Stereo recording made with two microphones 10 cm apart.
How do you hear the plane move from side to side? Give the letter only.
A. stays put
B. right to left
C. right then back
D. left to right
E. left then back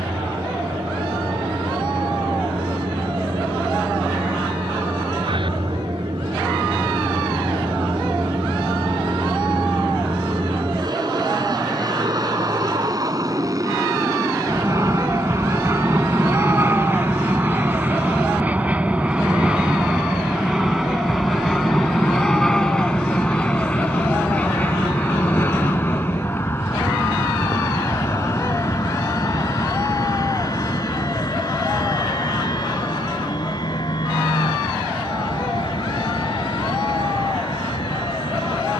B.